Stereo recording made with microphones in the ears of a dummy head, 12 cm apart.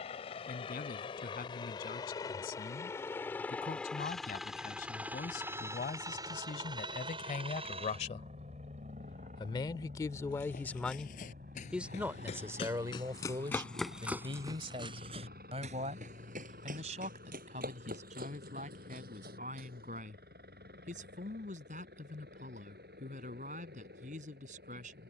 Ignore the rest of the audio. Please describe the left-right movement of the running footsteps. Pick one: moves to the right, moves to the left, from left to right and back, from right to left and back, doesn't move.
moves to the right.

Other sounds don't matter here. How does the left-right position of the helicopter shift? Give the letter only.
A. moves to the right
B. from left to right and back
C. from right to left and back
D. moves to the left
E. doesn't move
A.